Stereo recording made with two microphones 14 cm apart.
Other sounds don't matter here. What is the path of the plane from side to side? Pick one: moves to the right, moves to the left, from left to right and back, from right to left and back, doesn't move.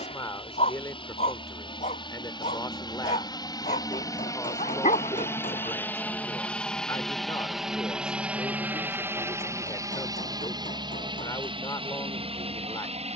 moves to the right.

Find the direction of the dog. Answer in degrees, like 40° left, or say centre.
60° left.